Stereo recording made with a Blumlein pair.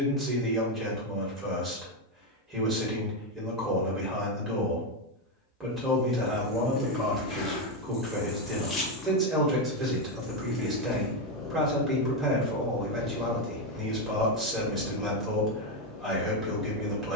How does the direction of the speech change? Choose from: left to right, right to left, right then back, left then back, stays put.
stays put.